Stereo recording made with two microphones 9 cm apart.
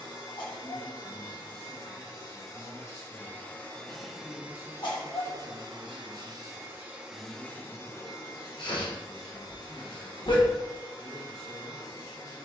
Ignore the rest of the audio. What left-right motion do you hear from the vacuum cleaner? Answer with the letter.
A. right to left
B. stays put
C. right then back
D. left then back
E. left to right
C.